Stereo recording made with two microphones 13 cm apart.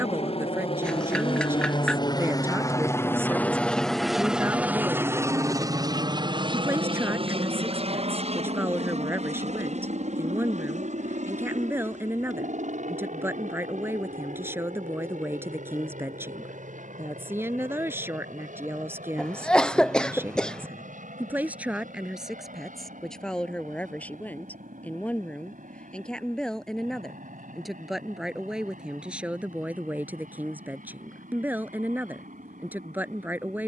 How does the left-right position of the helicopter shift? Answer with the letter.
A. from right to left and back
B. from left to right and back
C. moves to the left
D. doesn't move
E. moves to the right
E.